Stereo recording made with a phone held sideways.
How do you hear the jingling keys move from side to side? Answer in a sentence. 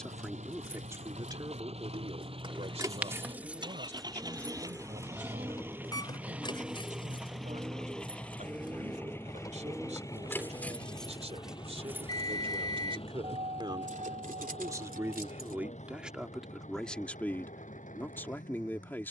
You can hear the jingling keys go left and come back.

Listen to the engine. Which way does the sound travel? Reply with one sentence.
You can hear the engine move from right to left.